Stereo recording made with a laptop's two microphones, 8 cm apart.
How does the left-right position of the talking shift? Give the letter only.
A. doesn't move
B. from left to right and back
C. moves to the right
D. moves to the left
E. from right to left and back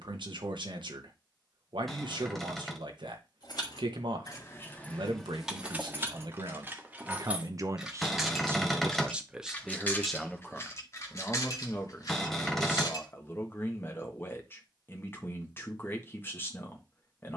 D.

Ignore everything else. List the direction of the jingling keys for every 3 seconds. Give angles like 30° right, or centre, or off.
off, 20° left, 10° right, 30° left, 50° left, off.